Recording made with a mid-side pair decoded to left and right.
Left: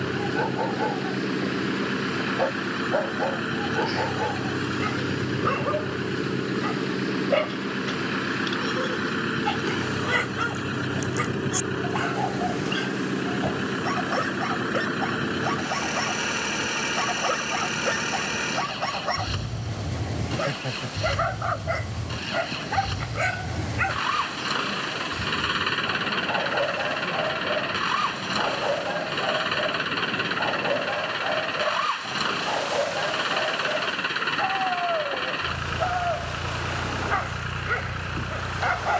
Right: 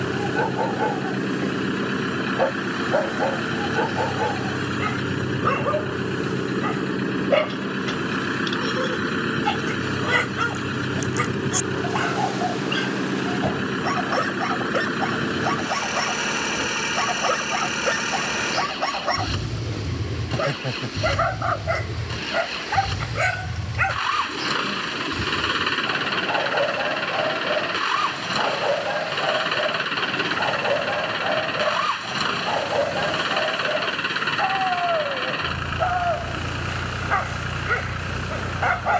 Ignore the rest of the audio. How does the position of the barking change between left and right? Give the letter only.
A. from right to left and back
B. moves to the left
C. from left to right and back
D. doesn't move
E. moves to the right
D.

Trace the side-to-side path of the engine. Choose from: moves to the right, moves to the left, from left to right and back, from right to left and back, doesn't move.
doesn't move.